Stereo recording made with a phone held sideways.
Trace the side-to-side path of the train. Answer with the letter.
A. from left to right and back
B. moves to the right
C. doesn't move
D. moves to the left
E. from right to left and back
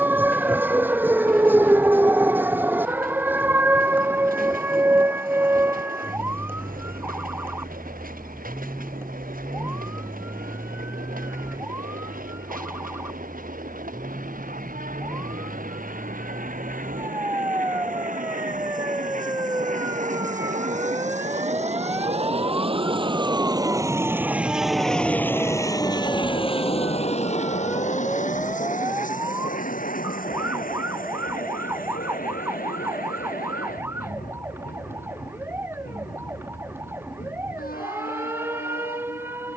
D.